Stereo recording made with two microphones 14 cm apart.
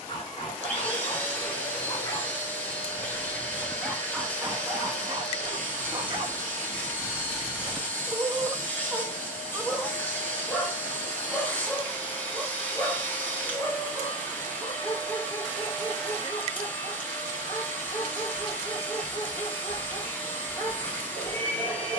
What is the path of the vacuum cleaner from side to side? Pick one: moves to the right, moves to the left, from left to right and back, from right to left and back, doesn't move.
doesn't move.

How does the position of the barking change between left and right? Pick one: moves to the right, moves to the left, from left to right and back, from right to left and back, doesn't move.
from left to right and back.